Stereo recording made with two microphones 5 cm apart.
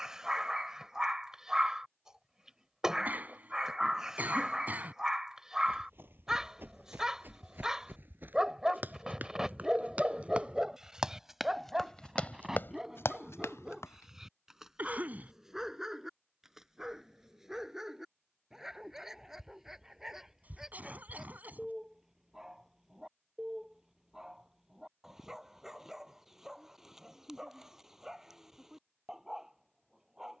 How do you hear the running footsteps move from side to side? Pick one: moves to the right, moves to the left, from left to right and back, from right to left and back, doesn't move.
moves to the left.